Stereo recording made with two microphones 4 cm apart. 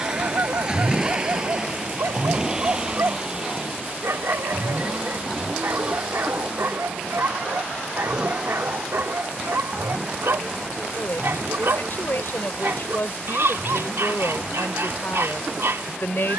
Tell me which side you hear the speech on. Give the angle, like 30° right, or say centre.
50° left.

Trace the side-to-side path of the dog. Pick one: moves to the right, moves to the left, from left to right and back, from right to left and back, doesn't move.
doesn't move.